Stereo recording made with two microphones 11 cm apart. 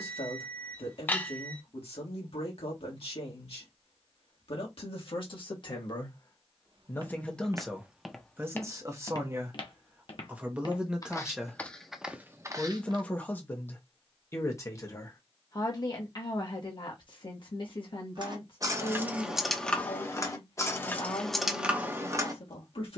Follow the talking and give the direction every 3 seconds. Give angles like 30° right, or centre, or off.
60° left, 50° left, centre, 10° right, 20° left, 40° left, 50° left, 60° left.